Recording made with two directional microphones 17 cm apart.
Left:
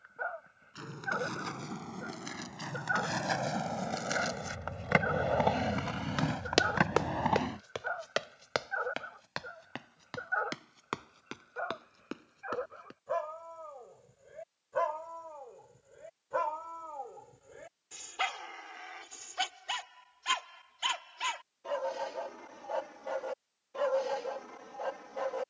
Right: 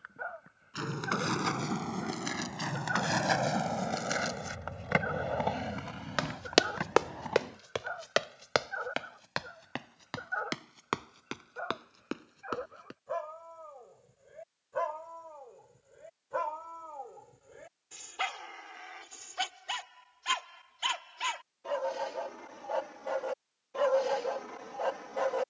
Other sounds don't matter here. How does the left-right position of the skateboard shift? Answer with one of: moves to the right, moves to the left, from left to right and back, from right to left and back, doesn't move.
moves to the left.